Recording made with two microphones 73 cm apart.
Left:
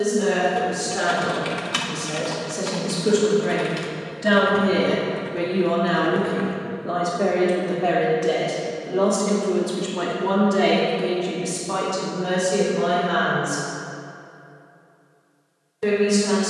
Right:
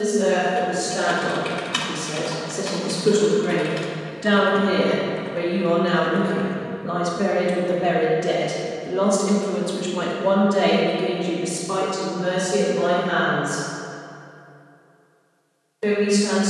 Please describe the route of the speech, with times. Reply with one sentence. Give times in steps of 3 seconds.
In this clip you hear the speech on the left from 0 s, in the centre from 3 s, on the right from 6 s, in the centre from 9 s and on the left from 12 s.